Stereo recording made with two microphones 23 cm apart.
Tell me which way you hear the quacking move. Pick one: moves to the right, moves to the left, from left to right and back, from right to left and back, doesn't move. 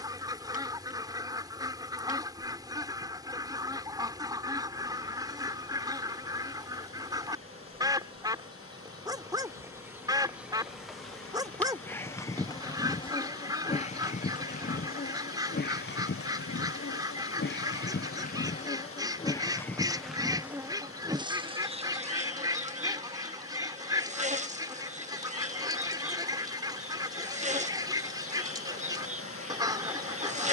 doesn't move.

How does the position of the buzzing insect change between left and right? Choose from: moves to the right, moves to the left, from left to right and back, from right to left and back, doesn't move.
from right to left and back.